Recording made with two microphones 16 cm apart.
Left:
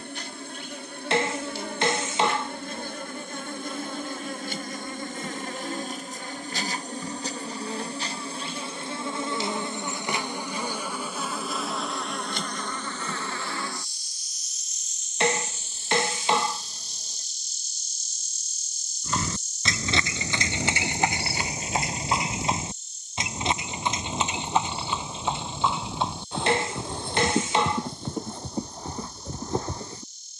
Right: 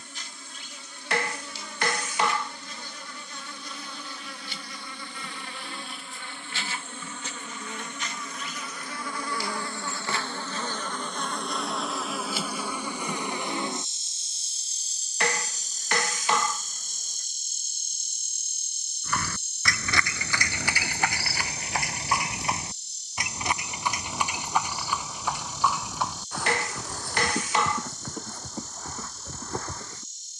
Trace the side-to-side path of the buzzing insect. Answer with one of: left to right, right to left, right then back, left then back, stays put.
left to right.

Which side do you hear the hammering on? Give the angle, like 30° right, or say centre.
20° left.